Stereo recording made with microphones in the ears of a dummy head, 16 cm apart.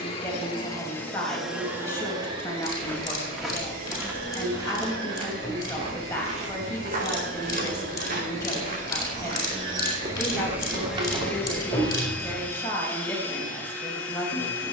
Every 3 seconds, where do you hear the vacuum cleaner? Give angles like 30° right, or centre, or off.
centre, 50° right, 50° right, 10° right, 10° left.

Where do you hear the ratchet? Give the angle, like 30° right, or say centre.
20° left.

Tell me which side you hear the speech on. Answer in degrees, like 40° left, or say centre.
10° left.